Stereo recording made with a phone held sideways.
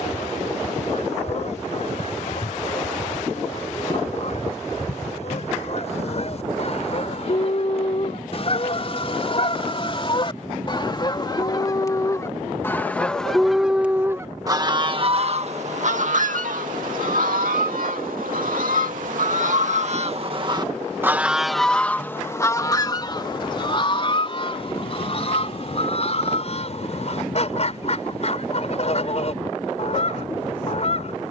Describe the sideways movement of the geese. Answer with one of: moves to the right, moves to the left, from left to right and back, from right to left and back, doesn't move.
from left to right and back.